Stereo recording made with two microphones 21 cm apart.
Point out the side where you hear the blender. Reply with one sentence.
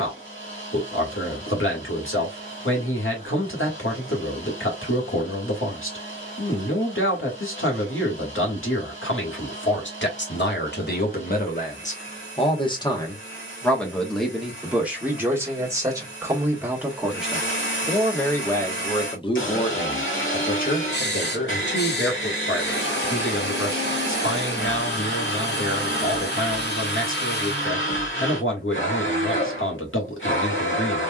In this clip you hear the blender on the left.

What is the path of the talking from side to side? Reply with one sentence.
You can hear the talking go right and come back.